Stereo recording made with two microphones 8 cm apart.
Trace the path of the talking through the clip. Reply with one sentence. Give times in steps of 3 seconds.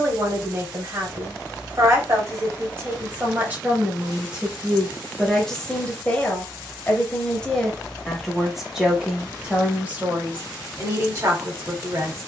In this clip you hear the talking on the right from 0 s, in the centre from 3 s and on the right from 9 s.